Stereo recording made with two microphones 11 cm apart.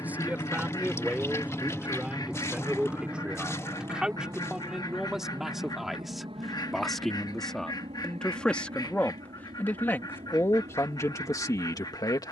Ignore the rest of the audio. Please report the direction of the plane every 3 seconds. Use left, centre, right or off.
centre, right, right, right.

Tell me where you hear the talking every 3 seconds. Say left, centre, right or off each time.
centre, centre, centre, left.